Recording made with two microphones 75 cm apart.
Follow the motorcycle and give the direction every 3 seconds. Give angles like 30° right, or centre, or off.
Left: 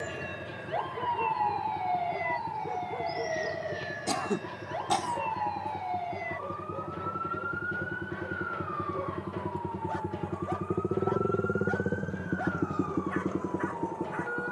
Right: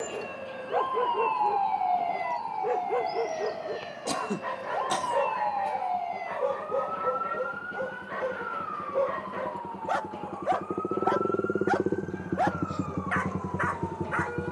80° left, 80° left, 70° left, 40° left, 20° right.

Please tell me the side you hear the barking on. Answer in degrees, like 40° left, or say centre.
80° right.